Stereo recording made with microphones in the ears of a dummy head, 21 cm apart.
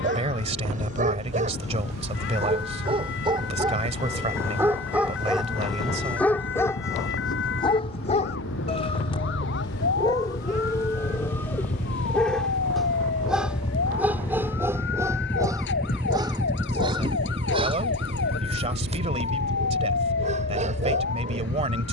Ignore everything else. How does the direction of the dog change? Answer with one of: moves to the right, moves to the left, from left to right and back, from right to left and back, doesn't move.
from right to left and back.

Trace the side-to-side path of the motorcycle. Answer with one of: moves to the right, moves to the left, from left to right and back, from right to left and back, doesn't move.
moves to the right.